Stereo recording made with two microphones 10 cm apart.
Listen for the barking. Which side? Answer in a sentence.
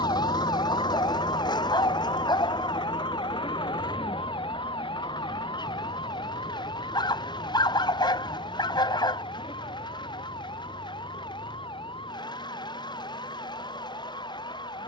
You can hear the barking on the left.